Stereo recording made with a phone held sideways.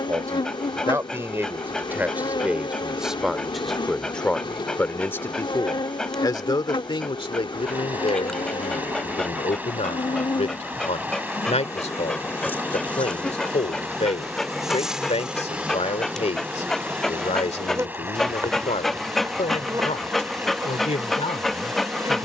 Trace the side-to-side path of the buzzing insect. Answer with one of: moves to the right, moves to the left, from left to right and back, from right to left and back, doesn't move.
moves to the right.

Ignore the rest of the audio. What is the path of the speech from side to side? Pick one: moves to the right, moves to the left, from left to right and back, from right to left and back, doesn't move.
moves to the left.